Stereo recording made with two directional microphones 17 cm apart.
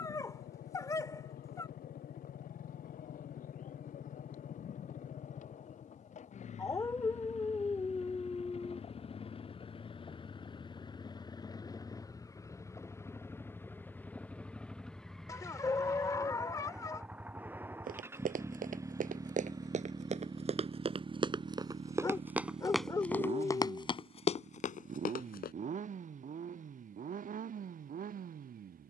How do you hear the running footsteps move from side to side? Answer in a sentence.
In this clip you hear the running footsteps go from the right side to the left.